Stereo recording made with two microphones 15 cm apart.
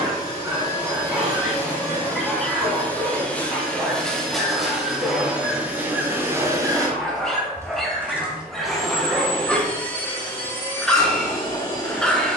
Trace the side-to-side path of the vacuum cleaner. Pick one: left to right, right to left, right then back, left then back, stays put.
right then back.